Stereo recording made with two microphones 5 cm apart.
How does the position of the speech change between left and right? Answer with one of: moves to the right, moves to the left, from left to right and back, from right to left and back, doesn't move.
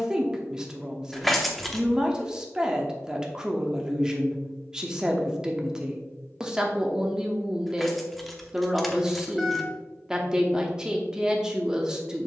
doesn't move.